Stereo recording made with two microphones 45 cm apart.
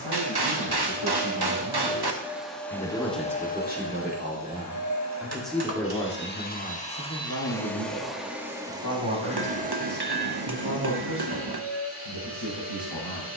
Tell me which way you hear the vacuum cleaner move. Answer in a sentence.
You can hear the vacuum cleaner move from right to left and back again.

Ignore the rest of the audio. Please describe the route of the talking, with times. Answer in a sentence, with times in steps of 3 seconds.
In this clip you hear the talking on the left from 0 s, in the centre from 3 s and on the left from 6 s.